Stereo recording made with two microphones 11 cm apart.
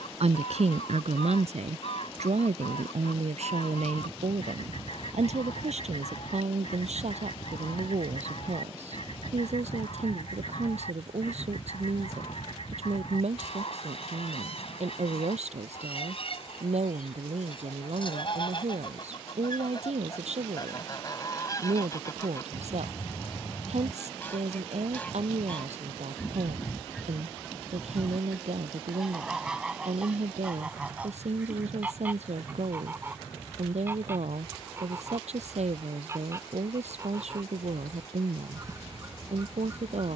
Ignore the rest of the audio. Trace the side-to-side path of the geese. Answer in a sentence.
You can hear the geese go from the left side to the right.